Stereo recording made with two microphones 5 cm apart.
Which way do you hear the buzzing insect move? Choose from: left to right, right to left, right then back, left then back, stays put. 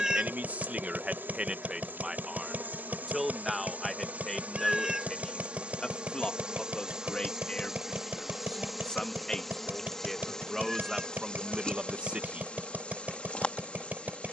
right to left.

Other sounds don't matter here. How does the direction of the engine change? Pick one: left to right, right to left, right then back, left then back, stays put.
stays put.